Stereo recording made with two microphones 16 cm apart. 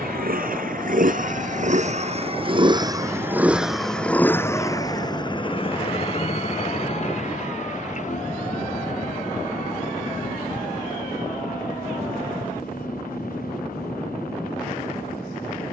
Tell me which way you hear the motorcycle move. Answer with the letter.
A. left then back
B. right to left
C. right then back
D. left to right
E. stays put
B.